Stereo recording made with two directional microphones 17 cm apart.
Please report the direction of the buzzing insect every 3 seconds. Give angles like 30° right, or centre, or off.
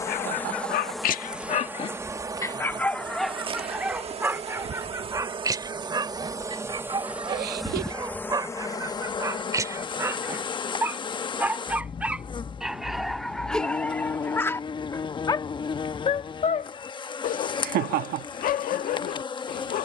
10° right, 30° right, centre, 30° left, 30° left, 30° left, 30° left.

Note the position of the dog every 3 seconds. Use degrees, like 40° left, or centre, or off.
40° left, 10° right, 20° right, 20° right, centre, 50° left, 60° left.